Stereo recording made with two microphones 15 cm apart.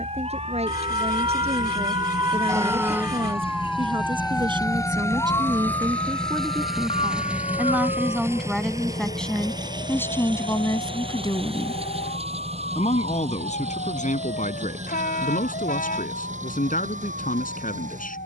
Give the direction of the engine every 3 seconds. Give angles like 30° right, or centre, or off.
50° left, 20° left, 10° right, 30° right, 40° right, 50° right.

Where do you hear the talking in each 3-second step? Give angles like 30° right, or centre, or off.
40° right, 30° right, 10° right, 20° left, 50° left, 60° left.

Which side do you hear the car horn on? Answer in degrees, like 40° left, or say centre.
70° left.